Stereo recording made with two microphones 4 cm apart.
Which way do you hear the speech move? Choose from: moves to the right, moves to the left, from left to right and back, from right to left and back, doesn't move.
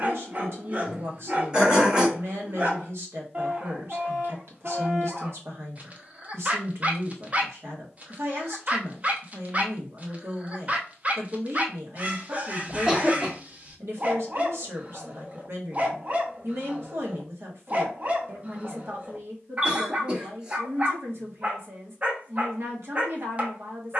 doesn't move.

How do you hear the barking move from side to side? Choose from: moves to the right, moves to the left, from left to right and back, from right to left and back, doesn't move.
doesn't move.